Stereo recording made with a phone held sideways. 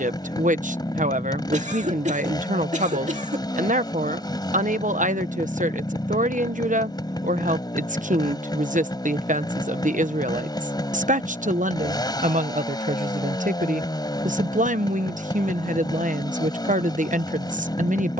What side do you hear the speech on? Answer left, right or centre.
right.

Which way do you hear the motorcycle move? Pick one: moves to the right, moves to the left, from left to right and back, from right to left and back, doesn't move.
doesn't move.